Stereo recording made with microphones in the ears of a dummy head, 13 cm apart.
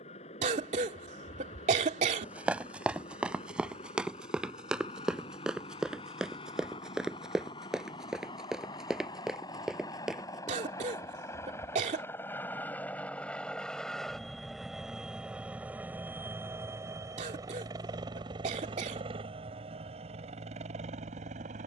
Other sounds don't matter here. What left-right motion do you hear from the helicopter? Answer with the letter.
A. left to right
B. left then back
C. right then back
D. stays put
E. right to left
A.